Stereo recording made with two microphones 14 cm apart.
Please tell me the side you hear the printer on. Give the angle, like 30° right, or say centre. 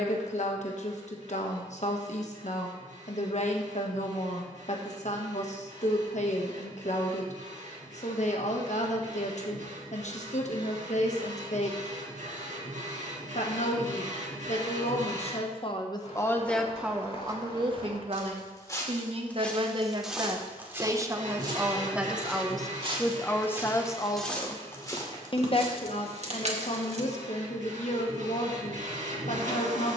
60° right.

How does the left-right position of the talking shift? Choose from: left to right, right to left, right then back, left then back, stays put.
right then back.